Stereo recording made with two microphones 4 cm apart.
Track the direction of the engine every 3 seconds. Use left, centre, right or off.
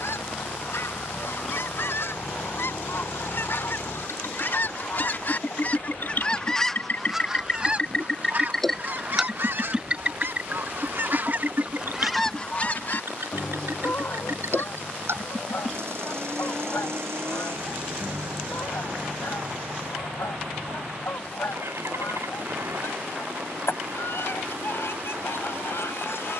left, left, left, right, right, right, right, right, right.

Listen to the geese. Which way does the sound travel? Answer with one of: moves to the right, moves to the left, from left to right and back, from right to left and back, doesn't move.
from left to right and back.